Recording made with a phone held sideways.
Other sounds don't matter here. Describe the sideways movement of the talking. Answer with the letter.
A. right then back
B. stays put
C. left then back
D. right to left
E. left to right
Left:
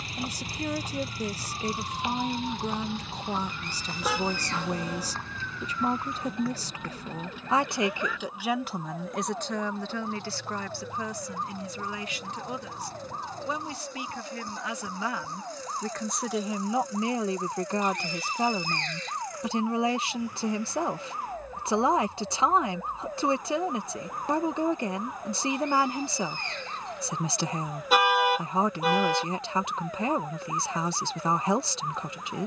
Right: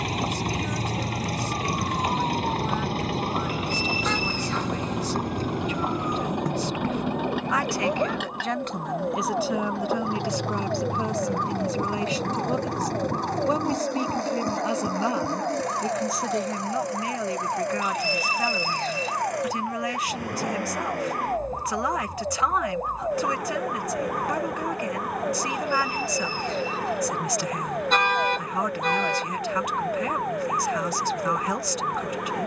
A.